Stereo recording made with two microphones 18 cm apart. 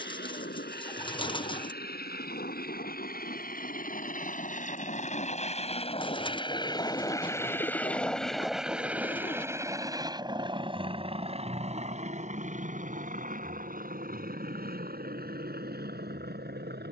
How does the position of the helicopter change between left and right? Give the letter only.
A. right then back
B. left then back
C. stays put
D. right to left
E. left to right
E.